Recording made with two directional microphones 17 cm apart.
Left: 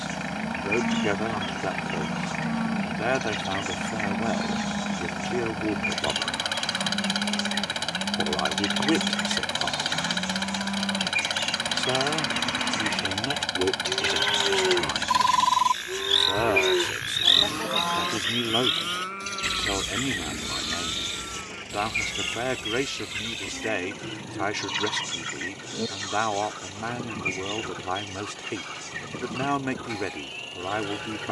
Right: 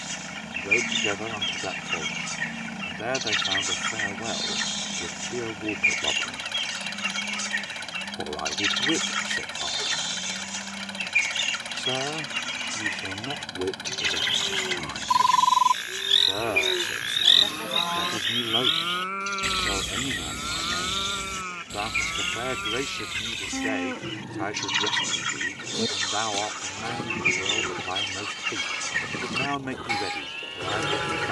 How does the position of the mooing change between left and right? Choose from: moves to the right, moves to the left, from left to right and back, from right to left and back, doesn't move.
moves to the right.